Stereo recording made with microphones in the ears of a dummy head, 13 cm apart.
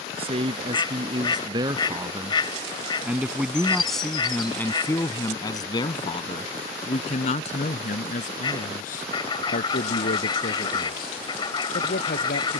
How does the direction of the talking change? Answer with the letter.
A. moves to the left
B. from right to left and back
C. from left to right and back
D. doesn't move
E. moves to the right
A.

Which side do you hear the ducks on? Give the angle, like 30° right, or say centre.
30° left.